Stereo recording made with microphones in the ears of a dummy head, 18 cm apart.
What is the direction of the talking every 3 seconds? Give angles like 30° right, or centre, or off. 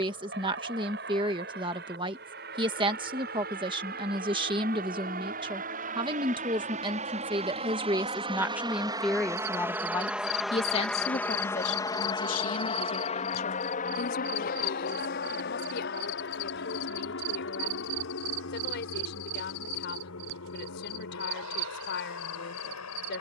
30° right, 30° right, 20° right, 30° left, 50° left, 60° left, 60° left, 60° left.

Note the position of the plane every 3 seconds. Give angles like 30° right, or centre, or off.
60° right, 50° right, 30° right, centre, 30° left, 60° left, 70° left, 70° left.